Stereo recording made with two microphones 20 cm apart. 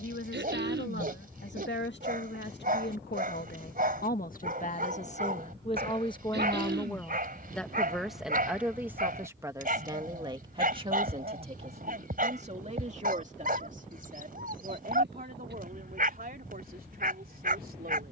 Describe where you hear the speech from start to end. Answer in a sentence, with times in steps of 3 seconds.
You can hear the speech on the left from 0 s, in the centre from 6 s and on the right from 9 s.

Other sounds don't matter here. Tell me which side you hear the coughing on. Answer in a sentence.
In this clip you hear the coughing on the right.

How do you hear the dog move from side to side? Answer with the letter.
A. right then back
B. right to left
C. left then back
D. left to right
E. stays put
E.